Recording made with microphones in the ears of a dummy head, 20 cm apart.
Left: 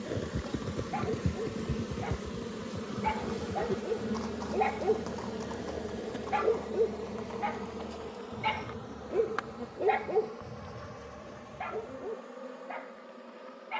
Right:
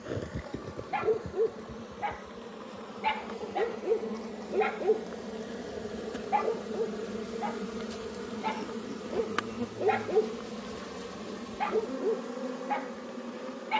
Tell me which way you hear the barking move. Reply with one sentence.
You can hear the barking go left and come back.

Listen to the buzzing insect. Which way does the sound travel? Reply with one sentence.
In this clip you hear the buzzing insect go from the left side to the right.